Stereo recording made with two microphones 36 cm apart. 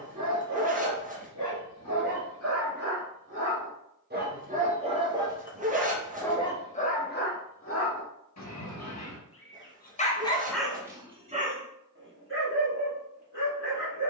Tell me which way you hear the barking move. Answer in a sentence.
In this clip you hear the barking move from right to left and back again.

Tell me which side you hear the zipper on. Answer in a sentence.
In this clip you hear the zipper on the right.